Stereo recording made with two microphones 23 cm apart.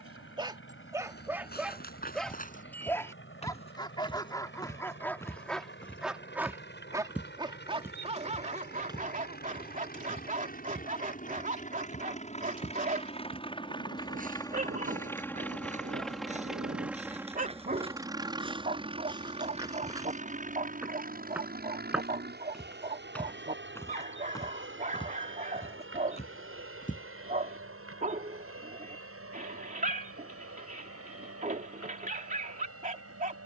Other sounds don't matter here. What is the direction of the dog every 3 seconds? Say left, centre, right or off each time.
centre, centre, right, right, right, right, right, right, right, right, right.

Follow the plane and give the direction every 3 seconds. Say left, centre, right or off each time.
left, left, left, left, left, centre, right, right, right, right, right.